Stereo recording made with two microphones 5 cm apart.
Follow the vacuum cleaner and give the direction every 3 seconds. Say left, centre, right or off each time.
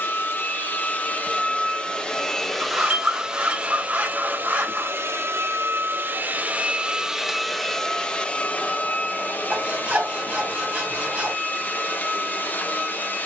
left, right, centre, left, left.